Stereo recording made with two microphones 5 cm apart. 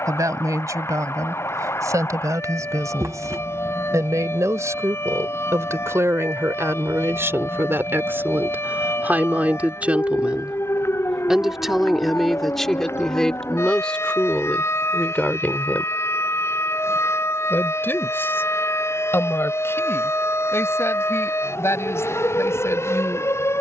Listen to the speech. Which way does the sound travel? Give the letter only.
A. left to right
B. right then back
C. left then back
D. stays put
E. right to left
E.